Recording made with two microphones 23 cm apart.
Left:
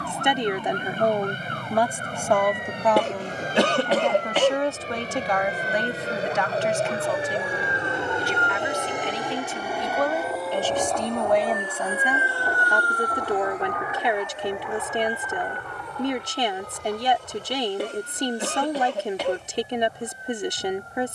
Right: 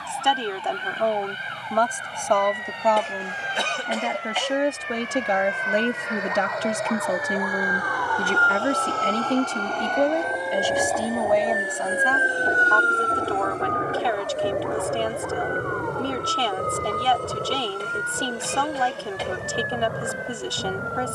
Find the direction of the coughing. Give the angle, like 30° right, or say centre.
70° left.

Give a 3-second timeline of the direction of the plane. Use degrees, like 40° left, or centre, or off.
50° left, 40° left, 30° left, centre, 30° right, 50° right, 60° right.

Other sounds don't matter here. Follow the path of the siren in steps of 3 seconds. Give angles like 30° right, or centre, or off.
60° left, 50° left, 30° left, 10° right, 40° right, 60° right, 70° right.